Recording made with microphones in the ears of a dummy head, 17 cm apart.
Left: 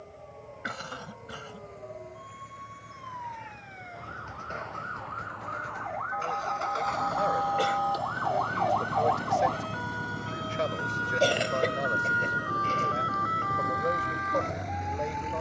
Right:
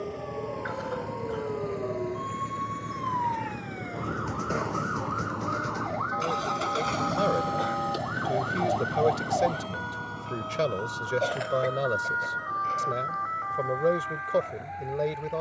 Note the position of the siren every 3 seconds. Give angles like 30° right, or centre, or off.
70° right, 60° right, 40° right, 10° left, 40° left.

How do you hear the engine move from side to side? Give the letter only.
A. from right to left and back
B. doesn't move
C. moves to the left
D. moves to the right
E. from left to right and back
C.